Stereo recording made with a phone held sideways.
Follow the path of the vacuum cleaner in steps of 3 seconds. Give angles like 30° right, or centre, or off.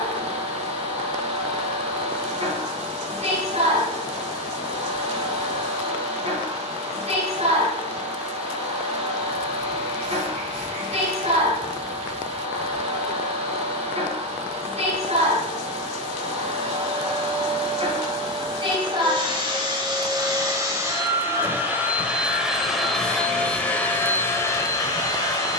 50° right, 50° right, 50° right, 50° right, 50° right, 50° right, 40° right, centre, 20° left.